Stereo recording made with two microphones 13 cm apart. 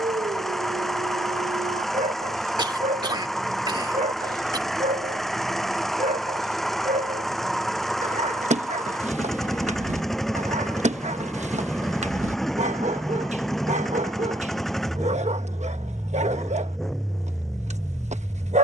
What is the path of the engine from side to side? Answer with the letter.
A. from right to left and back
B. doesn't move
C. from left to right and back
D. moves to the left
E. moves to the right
B.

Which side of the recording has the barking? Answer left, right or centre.
right.